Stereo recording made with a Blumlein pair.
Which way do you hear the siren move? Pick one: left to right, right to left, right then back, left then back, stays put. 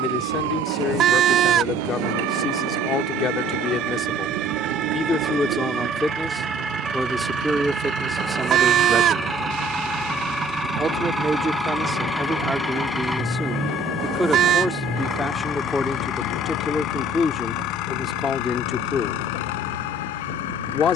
right to left.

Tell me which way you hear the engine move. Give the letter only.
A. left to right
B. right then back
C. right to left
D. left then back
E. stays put
C.